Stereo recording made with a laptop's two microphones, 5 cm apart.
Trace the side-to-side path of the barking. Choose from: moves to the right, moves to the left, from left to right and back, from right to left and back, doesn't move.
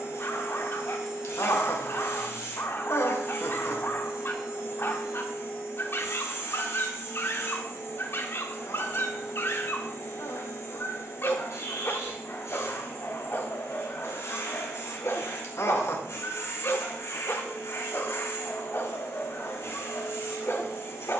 doesn't move.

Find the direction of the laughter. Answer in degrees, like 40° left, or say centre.
60° left.